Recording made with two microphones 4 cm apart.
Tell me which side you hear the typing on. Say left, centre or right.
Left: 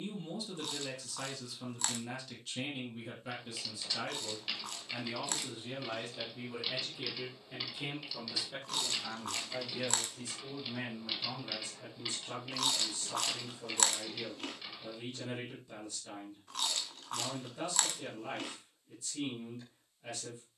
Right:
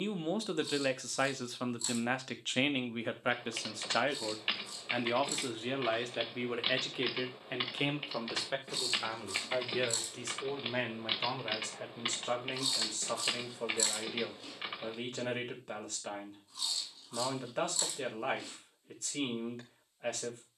right.